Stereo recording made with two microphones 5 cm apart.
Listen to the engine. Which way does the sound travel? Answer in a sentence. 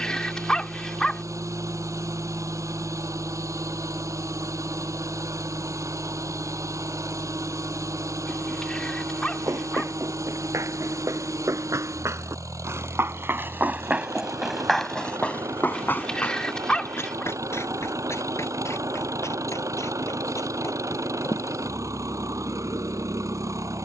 You can hear the engine stay put.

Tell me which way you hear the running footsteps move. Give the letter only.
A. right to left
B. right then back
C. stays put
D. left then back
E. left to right
A.